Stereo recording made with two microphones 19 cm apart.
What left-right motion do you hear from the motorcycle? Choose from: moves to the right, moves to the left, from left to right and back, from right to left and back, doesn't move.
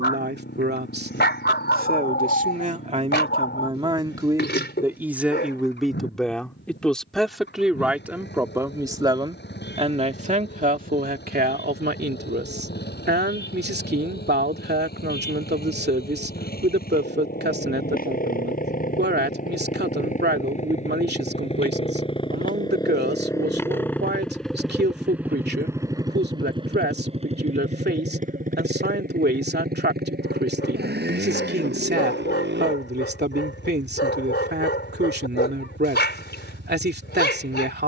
moves to the right.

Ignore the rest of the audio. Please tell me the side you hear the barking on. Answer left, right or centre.
left.